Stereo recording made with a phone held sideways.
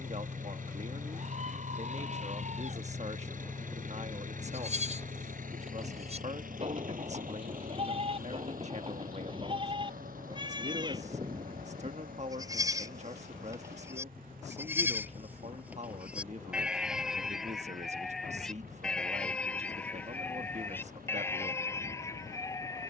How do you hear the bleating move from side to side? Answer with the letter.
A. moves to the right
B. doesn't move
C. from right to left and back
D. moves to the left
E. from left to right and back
D.